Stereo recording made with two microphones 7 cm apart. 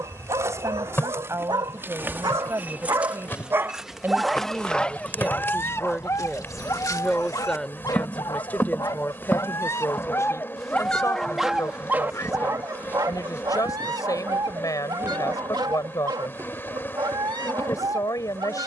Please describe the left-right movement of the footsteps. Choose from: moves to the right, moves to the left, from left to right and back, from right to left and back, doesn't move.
from right to left and back.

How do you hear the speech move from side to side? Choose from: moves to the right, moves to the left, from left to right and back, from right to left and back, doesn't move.
moves to the left.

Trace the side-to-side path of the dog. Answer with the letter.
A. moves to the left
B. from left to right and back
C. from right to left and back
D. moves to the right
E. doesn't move
C.